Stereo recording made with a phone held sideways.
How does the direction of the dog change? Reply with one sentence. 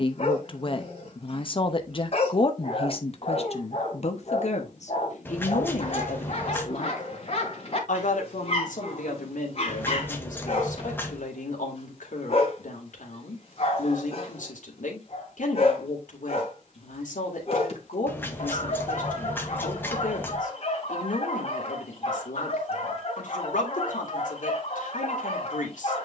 In this clip you hear the dog stay put.